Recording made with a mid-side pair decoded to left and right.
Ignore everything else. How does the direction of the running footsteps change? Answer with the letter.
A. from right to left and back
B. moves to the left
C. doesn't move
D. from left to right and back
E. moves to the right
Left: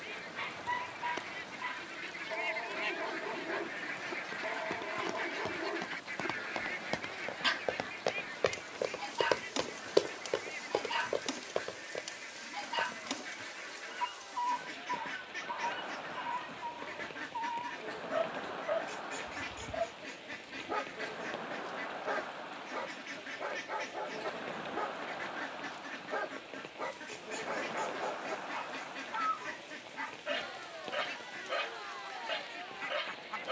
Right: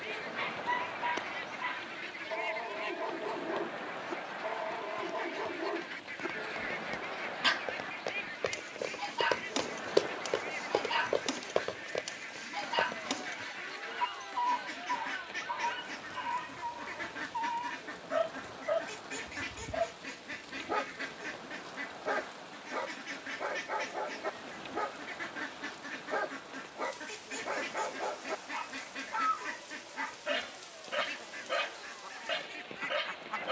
E.